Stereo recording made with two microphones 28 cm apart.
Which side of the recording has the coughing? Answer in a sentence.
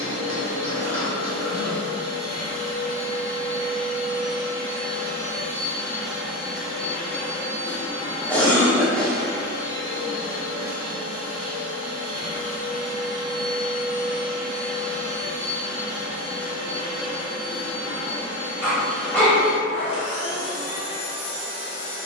You can hear the coughing in the centre.